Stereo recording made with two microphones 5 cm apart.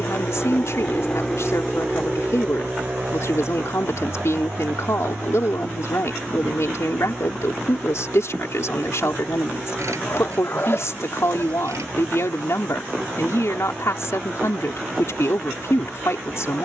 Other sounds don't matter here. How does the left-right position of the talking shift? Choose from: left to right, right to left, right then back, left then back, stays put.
stays put.